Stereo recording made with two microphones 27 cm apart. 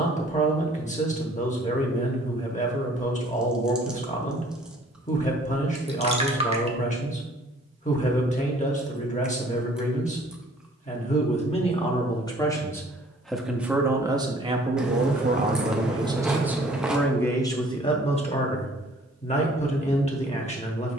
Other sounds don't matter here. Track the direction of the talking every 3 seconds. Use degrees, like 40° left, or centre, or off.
30° left, 30° left, 30° left, 30° left, 10° right, 10° right, 20° left.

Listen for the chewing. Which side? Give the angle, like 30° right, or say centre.
centre.